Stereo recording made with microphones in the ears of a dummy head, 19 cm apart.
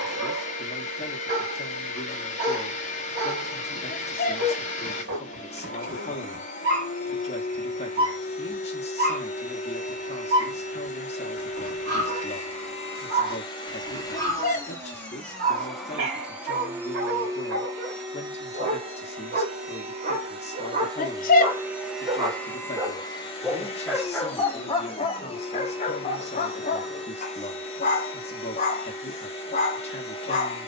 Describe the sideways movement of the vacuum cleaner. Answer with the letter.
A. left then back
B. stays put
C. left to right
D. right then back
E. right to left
D.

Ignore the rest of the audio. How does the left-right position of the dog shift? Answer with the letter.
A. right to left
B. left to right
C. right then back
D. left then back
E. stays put
A.